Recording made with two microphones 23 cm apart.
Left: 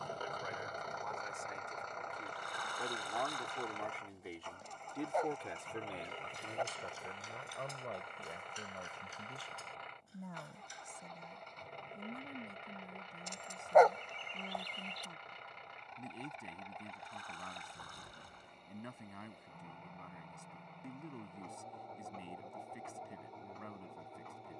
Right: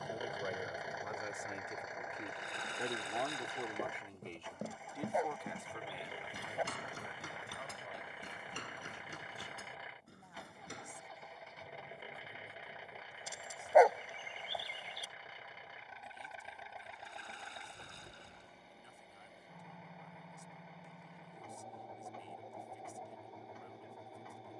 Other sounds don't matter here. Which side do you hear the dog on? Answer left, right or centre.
centre.